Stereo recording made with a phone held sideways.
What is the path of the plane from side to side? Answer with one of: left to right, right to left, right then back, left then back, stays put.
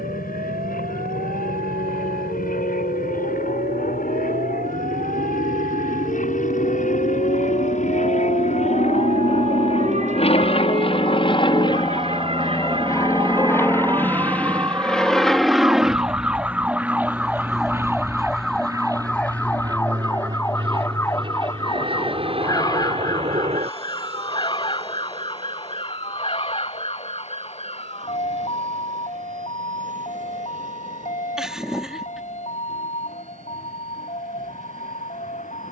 left to right.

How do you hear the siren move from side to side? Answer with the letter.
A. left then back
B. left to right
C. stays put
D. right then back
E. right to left
E.